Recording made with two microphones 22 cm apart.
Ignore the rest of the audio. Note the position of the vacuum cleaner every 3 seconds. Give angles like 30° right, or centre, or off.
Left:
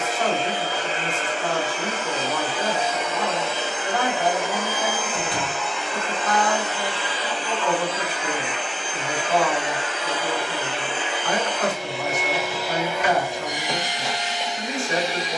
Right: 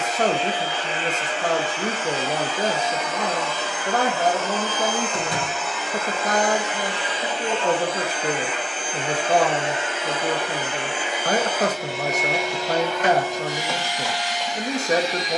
40° left, 10° left, 20° right, 20° right, 20° left.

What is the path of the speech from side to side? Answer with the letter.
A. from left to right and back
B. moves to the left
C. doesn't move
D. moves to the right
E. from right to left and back
C.